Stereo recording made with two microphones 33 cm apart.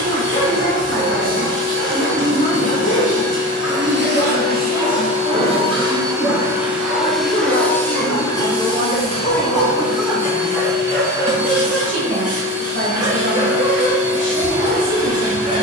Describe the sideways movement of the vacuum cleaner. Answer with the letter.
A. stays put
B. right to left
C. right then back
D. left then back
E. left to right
B.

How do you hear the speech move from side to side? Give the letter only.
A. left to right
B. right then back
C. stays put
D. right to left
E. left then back
E.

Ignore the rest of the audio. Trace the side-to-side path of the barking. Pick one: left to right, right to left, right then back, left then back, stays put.
left to right.